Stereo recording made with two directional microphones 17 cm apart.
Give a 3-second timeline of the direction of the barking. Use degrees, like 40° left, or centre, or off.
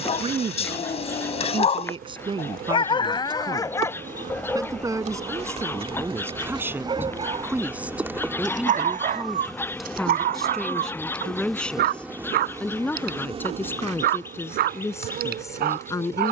40° left, 10° left, 30° right, 60° right, 70° right, 70° right.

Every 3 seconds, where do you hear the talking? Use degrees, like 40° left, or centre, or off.
30° right, 20° right, 10° right, centre, 10° left, 20° left.